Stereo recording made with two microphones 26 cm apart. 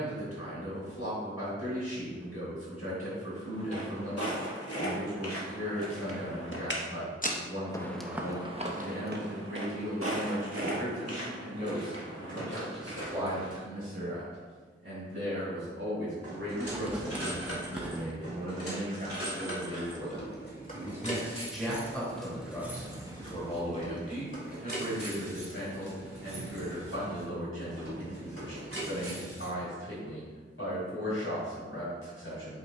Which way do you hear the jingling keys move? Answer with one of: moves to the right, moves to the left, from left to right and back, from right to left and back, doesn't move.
moves to the right.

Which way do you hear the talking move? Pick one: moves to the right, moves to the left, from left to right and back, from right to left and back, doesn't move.
from left to right and back.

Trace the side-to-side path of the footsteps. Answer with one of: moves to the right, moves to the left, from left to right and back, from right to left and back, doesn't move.
moves to the right.